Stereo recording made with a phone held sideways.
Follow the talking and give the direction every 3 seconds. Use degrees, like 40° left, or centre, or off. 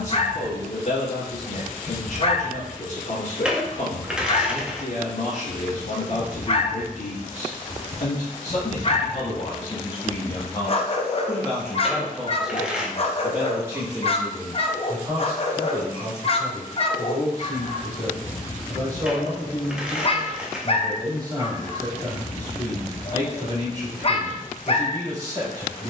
60° left, 60° left, 50° left, 30° left, 10° right, 30° right, 30° right, 30° right, 30° right.